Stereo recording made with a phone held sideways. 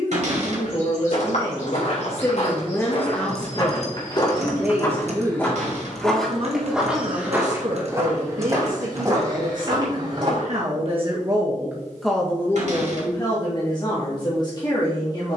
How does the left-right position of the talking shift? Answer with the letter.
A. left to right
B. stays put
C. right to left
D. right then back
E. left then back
D.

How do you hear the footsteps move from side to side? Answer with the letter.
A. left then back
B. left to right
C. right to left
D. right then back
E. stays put
B.